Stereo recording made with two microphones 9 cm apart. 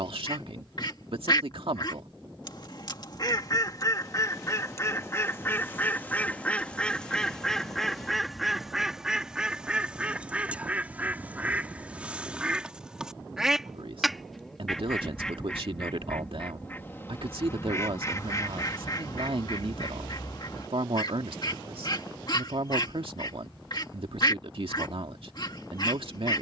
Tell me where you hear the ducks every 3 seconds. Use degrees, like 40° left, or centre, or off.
50° left, 30° left, 10° left, 10° right, 10° right, 20° left, 40° left, 50° left, 50° left.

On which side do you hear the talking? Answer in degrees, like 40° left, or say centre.
80° right.